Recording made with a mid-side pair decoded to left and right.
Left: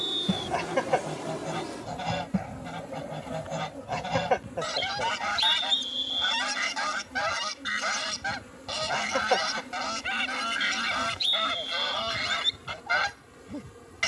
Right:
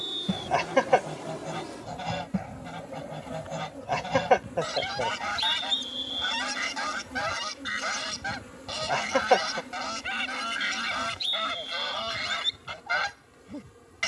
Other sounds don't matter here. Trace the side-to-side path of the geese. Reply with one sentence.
In this clip you hear the geese stay in one place.